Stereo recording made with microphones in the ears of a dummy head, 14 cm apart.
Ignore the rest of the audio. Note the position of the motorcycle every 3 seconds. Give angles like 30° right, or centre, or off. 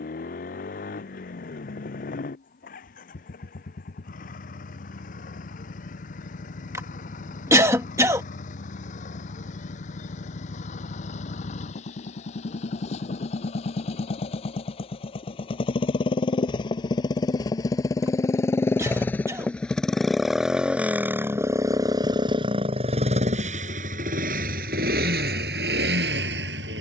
50° left, 50° left, 50° left, 50° left, 40° left, 30° left, 10° left, 30° right, 60° right.